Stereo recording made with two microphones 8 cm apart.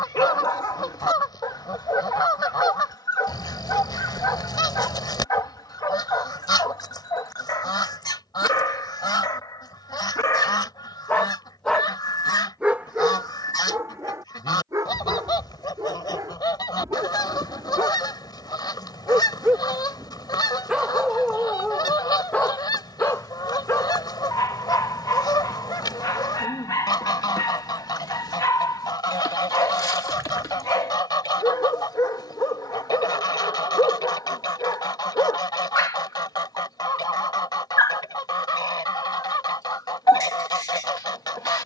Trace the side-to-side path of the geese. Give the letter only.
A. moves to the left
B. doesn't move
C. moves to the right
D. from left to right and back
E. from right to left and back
B.